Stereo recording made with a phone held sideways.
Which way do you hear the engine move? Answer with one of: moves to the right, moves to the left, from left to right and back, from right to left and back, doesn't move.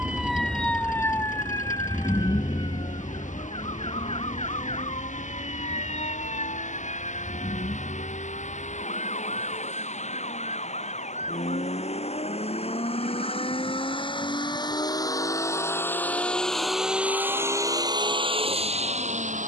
moves to the right.